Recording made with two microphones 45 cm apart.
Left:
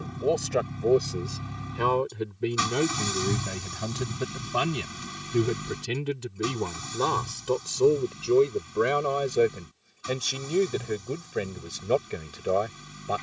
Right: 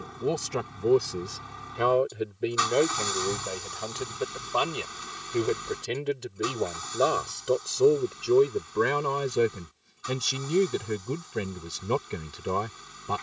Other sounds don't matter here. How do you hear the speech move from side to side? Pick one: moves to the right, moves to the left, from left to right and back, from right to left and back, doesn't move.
from right to left and back.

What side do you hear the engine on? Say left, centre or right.
left.